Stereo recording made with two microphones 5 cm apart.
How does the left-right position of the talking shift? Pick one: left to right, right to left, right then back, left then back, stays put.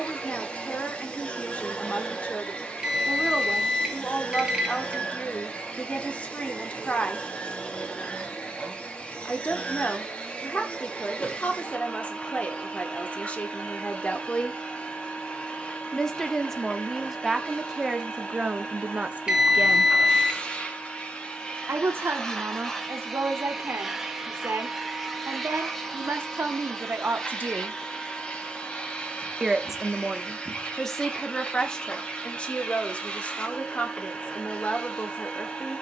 right then back.